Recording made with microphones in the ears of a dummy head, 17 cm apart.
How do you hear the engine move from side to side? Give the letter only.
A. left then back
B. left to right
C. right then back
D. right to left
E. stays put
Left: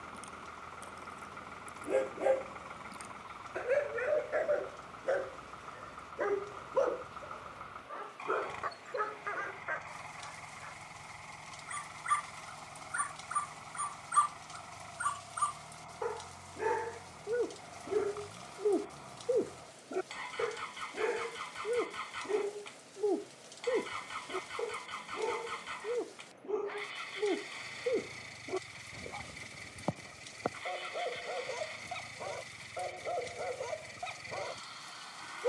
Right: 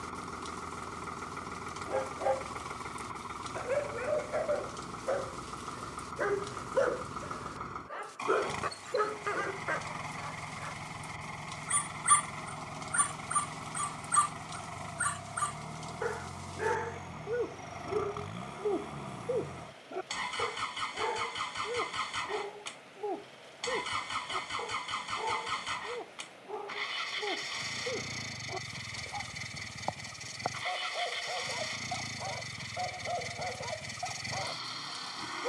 E.